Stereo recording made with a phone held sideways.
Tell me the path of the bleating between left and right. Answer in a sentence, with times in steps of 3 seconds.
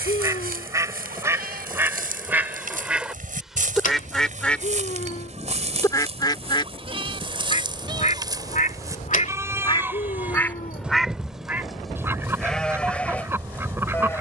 In this clip you hear the bleating on the right from 0 s and in the centre from 9 s.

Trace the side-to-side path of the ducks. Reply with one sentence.
You can hear the ducks go left and come back.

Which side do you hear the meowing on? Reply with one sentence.
You can hear the meowing on the left.